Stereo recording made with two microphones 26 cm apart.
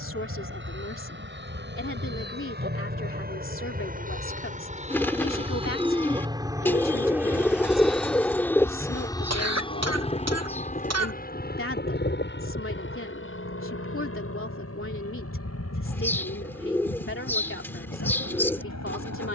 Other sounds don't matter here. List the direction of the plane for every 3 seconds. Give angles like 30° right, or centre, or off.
50° right, 30° right, centre, 30° left, 50° left, 60° left, 70° left.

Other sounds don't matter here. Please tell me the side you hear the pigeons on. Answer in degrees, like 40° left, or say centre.
10° left.